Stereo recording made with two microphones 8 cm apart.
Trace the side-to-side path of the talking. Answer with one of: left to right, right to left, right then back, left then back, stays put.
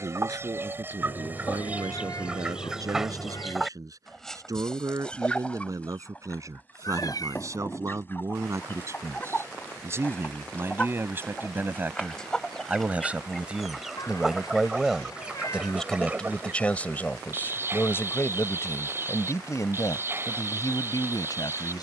right to left.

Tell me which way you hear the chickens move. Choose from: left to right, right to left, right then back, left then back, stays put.
left then back.